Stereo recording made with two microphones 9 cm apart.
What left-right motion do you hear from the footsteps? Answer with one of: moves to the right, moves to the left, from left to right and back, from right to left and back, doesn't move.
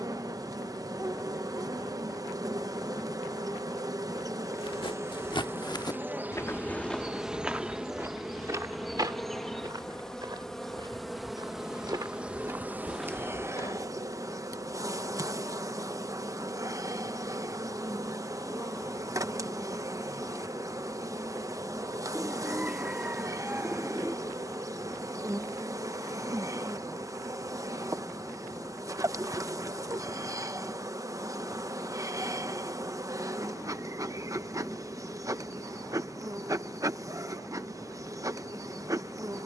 from left to right and back.